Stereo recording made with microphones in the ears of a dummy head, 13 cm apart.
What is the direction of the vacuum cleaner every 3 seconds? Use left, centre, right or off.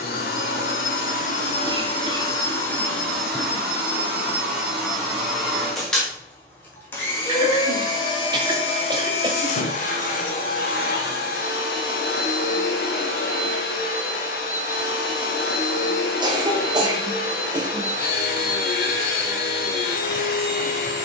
left, centre, left, left, left, left, left.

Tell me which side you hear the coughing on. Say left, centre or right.
right.